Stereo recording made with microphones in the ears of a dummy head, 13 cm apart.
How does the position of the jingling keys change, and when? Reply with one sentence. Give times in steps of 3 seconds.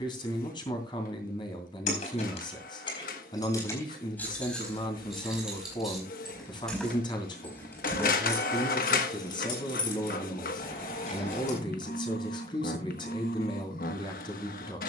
You can hear the jingling keys on the left from 0 s, in the centre from 3 s, on the left from 9 s and not at all from 12 s.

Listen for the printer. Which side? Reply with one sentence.
In this clip you hear the printer on the left.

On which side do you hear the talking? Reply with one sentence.
In this clip you hear the talking on the left.